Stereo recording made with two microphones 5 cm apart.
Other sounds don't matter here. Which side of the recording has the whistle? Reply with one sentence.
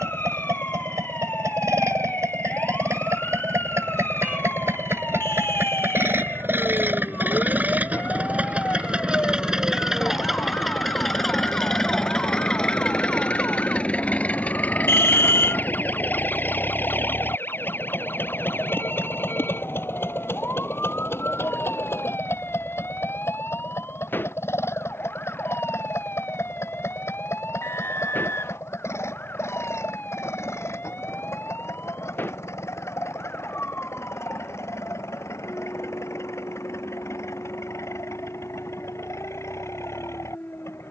You can hear the whistle on the left.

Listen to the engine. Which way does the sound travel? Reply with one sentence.
In this clip you hear the engine move to the left.